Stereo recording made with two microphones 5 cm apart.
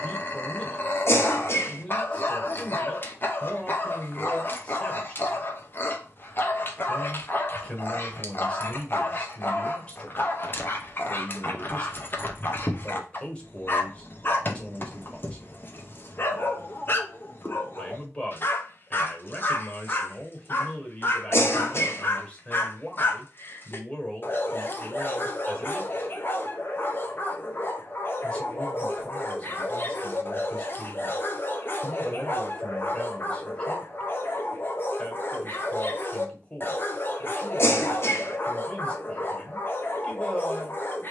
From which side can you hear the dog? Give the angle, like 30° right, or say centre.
40° left.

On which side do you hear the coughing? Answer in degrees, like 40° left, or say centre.
60° left.